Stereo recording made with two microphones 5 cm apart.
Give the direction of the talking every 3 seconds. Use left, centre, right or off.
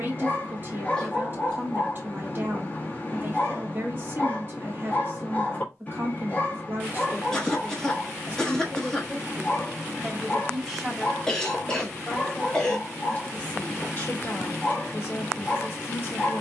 right, right, right, centre, left, left.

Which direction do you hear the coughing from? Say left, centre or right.
centre.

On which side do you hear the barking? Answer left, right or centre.
left.